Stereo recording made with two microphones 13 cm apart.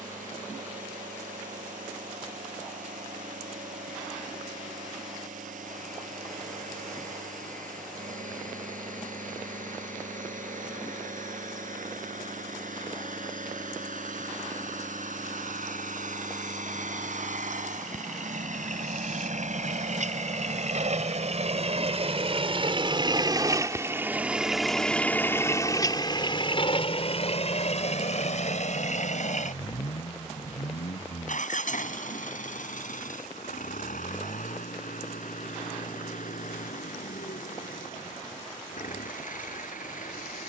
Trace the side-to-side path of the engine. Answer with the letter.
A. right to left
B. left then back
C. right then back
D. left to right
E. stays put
A.